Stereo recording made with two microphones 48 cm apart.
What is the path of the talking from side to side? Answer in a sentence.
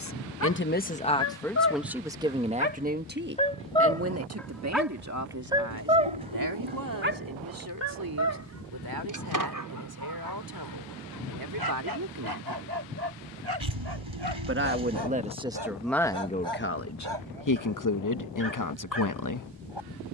You can hear the talking move from left to right and back again.